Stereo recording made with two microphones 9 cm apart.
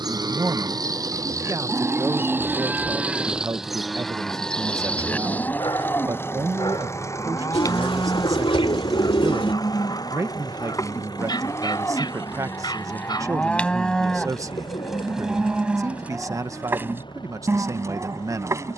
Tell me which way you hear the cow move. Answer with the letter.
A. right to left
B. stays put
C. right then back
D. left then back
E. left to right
D.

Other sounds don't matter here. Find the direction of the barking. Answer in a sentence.
You can hear the barking on the left.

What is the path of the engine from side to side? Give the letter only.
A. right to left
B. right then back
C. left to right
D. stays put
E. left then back
A.